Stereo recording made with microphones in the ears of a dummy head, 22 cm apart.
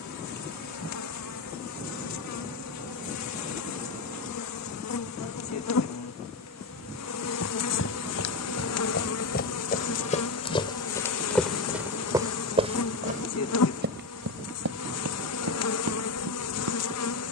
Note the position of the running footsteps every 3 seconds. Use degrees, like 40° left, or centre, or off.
off, off, 50° left, 20° left, 30° right, 60° right.